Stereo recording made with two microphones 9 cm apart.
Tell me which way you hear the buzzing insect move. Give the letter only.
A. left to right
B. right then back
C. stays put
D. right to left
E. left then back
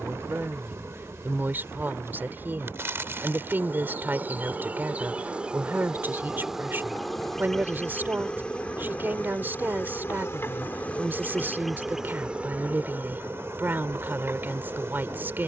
E.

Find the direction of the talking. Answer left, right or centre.
right.